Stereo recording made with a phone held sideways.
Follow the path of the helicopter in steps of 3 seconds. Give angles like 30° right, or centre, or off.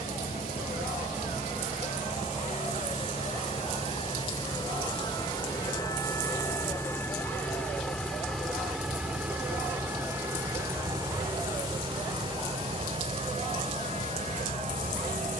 50° left, 30° left, 10° left, 20° right, 40° right.